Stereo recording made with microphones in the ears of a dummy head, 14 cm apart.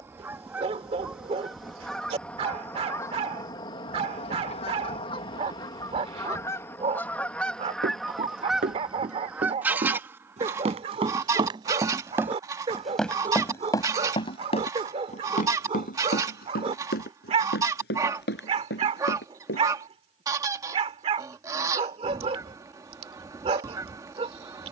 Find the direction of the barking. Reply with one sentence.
You can hear the barking on the right.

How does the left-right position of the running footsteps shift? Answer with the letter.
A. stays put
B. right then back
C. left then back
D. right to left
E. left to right
D.